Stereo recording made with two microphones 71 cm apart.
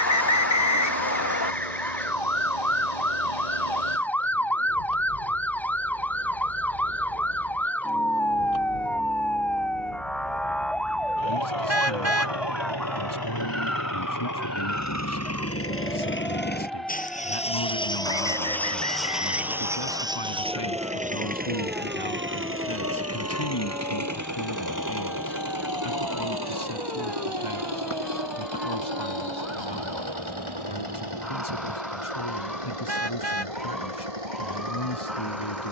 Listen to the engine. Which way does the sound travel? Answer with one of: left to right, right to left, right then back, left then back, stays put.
left to right.